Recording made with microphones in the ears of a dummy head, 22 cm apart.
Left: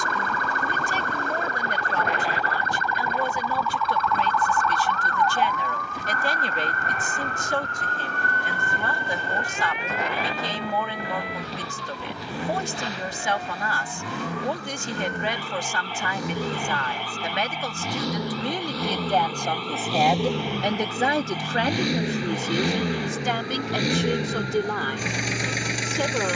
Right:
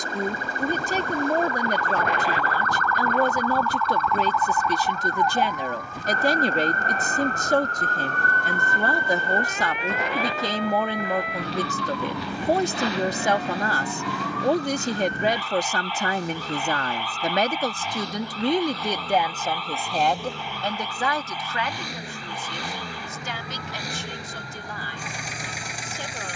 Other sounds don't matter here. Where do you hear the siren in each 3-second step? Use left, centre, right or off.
left, centre, right, right, right, right, right, right, right.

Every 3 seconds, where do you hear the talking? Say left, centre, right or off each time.
right, right, right, right, right, right, centre, left, left.